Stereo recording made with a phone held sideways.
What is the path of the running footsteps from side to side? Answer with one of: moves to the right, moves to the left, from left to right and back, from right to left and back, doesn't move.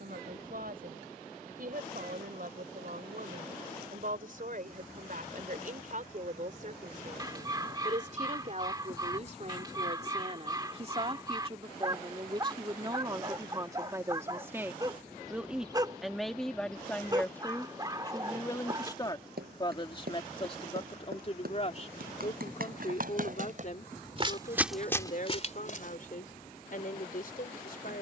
moves to the left.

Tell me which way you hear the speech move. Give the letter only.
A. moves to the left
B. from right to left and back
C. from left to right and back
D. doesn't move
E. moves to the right
A.